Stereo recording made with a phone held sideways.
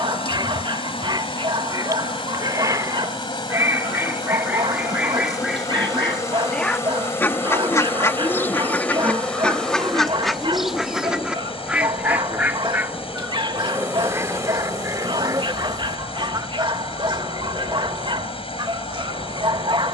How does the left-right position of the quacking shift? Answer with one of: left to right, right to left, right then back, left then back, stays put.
left then back.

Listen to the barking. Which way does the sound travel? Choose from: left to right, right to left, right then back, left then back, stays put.
stays put.